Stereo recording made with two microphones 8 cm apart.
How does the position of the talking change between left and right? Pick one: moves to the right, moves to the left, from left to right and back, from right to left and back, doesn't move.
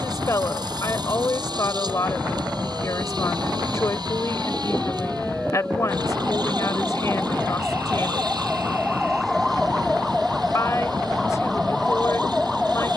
doesn't move.